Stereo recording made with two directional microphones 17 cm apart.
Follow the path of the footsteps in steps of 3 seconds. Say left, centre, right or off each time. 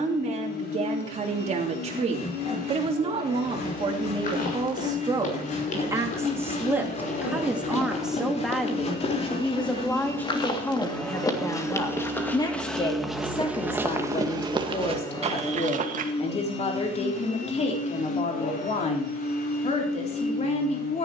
off, left, left, left, centre, right, off.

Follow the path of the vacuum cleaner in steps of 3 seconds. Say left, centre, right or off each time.
left, left, left, centre, centre, left, left.